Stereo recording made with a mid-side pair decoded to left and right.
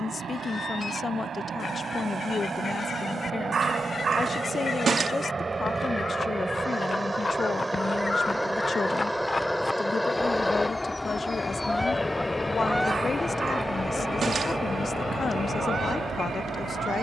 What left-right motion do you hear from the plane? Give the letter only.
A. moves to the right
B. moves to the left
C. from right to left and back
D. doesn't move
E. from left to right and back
B.